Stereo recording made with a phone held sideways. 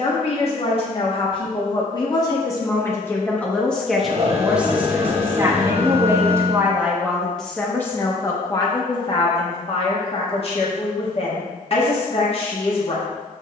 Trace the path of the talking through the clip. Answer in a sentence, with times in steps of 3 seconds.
In this clip you hear the talking on the left from 0 s, in the centre from 3 s and on the left from 9 s.